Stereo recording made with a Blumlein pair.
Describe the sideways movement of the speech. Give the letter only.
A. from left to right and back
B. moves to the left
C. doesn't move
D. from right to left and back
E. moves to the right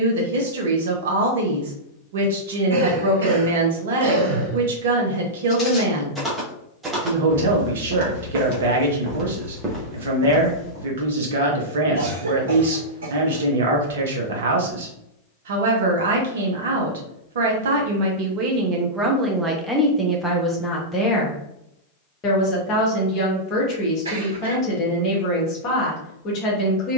B.